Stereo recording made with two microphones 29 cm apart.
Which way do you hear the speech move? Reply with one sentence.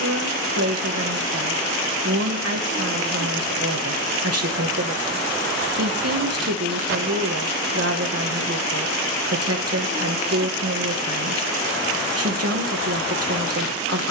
In this clip you hear the speech stay in one place.